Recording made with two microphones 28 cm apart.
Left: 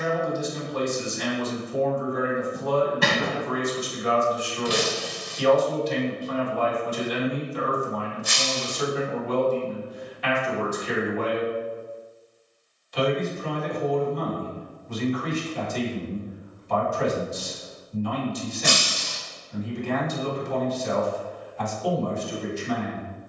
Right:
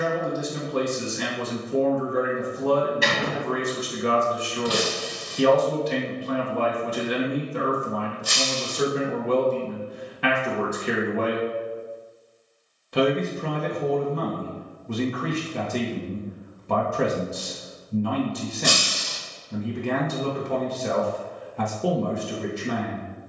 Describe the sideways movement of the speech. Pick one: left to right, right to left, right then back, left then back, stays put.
stays put.